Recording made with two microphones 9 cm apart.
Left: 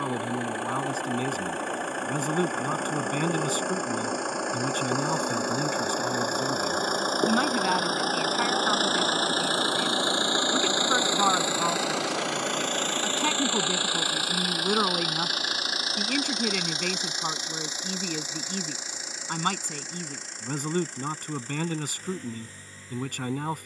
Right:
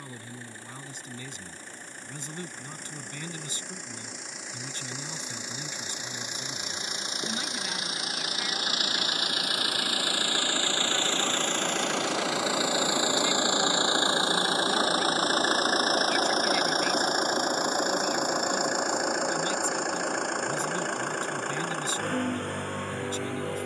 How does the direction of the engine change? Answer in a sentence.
In this clip you hear the engine move from left to right.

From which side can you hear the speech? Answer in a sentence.
You can hear the speech on the left.